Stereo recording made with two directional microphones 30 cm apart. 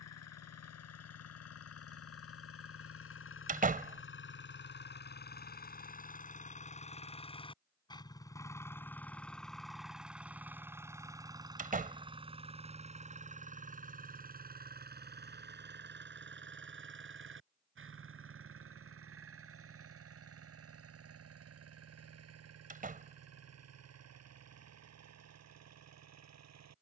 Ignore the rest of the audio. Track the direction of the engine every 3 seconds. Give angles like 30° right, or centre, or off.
50° left, 40° left, 20° left, 10° right, 20° right, 40° right, 50° right, 50° right, 60° right.